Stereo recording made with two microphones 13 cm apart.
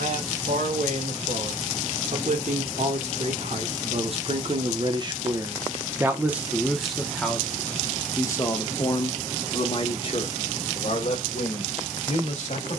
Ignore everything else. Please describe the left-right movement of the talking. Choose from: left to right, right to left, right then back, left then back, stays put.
right to left.